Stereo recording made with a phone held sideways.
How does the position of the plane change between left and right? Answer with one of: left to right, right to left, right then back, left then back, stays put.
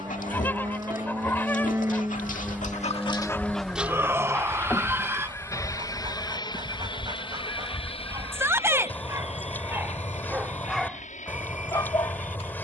right to left.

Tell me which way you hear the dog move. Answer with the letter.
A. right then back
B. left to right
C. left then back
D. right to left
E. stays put
A.